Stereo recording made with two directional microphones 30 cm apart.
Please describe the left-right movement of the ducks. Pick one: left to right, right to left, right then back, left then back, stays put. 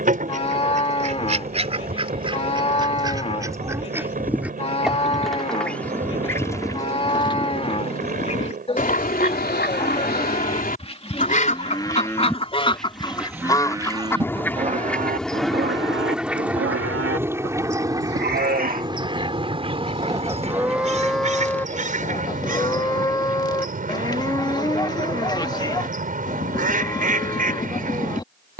left then back.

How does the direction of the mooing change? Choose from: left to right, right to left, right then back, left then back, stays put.
right then back.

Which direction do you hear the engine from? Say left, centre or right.
right.